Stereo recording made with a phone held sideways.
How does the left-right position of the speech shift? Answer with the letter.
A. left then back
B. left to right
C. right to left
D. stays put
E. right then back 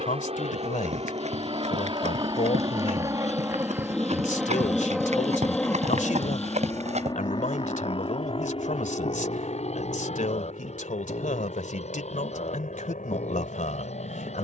D.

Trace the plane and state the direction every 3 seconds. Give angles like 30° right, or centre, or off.
40° right, 10° right, 30° left, 50° left, 60° left.